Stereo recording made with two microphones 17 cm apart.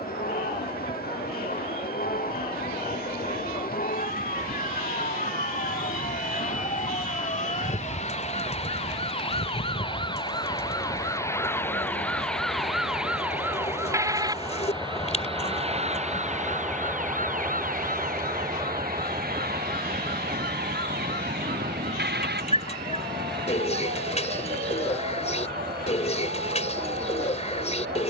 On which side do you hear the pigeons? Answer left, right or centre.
left.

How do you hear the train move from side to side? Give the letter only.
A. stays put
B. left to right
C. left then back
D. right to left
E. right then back
B.